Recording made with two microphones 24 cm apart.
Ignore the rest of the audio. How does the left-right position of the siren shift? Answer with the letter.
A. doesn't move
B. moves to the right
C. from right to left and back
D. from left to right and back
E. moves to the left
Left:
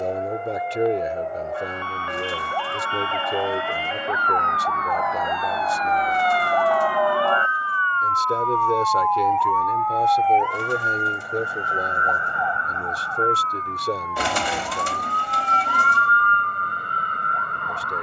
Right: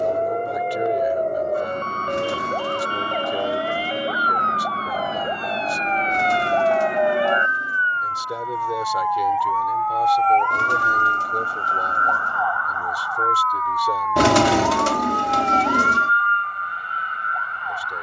E.